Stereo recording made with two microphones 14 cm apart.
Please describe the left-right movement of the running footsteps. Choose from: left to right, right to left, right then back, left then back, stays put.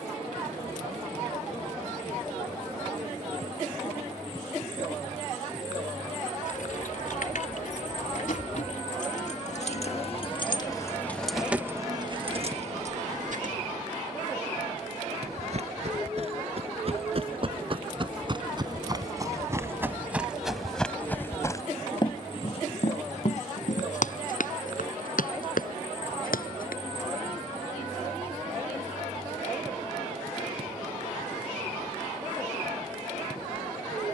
right to left.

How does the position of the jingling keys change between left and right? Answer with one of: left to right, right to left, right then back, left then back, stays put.
left to right.